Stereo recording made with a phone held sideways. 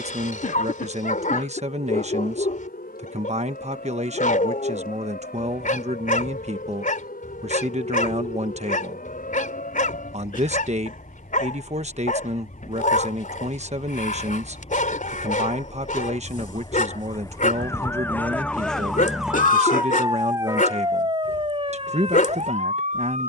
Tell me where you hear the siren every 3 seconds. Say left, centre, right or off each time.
left, left, left, left, left, left, centre, right.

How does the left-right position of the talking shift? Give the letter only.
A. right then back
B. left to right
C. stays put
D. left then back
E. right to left
C.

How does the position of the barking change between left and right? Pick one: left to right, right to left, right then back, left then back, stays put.
stays put.